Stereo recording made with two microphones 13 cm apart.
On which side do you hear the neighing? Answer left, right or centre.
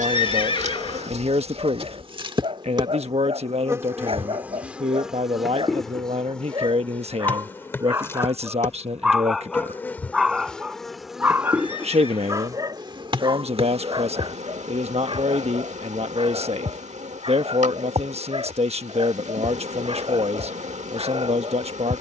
left.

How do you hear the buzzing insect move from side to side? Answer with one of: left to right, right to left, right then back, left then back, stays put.
left then back.